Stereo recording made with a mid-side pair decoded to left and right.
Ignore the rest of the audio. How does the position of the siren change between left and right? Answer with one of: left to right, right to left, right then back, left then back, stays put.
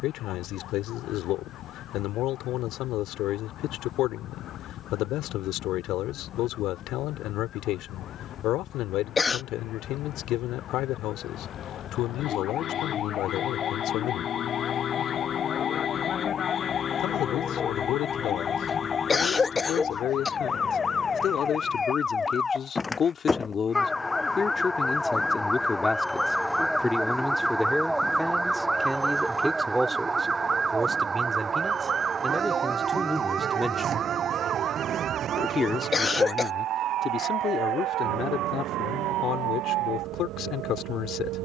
left to right.